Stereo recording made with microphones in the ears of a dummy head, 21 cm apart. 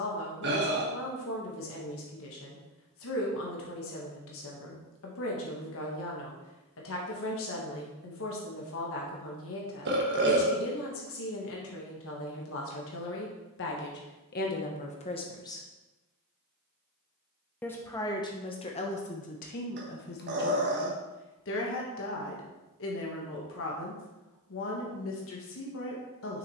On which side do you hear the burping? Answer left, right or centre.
right.